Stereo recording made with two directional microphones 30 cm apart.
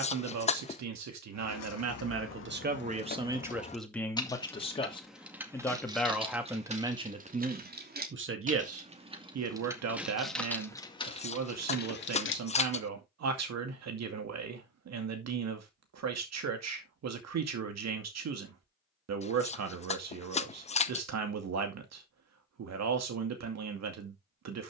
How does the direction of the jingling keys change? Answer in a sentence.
In this clip you hear the jingling keys move from left to right and back again.